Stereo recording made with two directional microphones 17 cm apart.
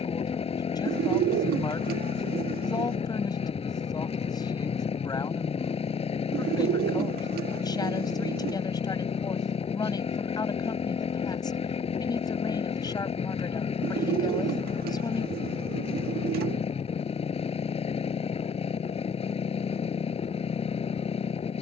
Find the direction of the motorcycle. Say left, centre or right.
left.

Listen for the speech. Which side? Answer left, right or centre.
left.